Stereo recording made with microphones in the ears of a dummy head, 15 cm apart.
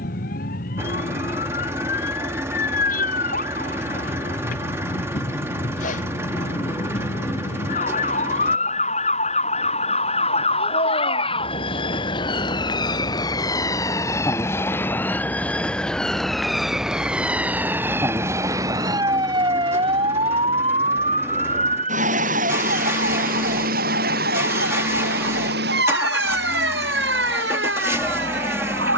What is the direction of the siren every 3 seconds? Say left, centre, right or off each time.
left, left, left, left, left, centre, right, right, right, right.